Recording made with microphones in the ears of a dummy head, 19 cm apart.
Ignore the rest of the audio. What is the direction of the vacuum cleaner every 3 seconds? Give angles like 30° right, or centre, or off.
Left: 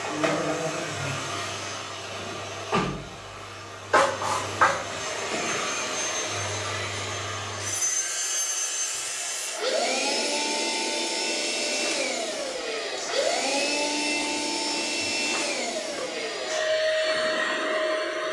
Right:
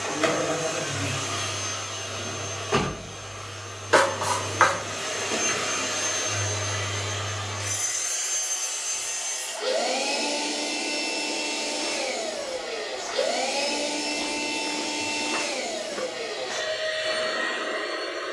30° right, 30° right, centre, 30° left, 50° left, 60° left.